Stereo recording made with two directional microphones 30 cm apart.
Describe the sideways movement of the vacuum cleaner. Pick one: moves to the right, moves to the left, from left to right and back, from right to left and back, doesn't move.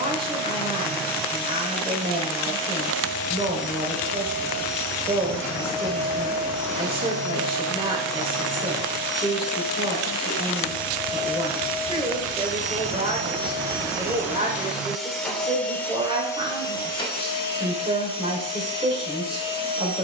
moves to the left.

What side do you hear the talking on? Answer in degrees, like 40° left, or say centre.
20° right.